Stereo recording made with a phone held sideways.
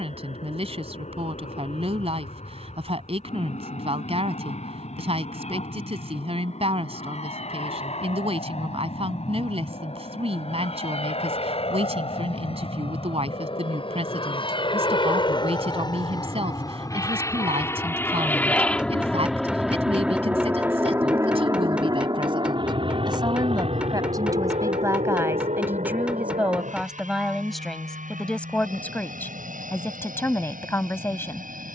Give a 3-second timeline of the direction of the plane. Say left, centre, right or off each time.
left, left, left, left, left, left, centre, right, right, right, right.